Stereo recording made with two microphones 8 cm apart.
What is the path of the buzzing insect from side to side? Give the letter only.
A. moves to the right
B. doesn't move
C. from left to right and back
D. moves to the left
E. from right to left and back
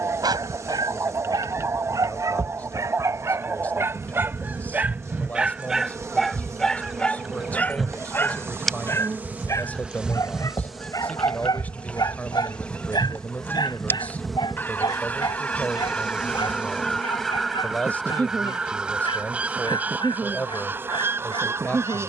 E.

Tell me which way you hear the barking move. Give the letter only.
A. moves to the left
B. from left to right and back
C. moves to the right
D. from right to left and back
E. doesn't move
A.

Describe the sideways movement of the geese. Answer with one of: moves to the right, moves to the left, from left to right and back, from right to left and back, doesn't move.
from right to left and back.